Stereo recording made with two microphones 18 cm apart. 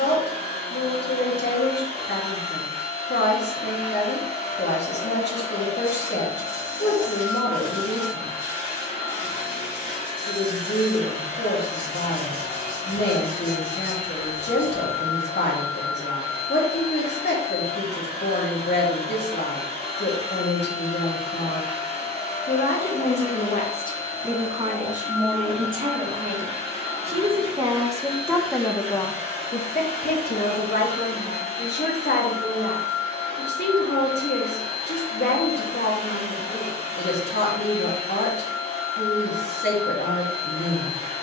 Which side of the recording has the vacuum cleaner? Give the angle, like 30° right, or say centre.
30° right.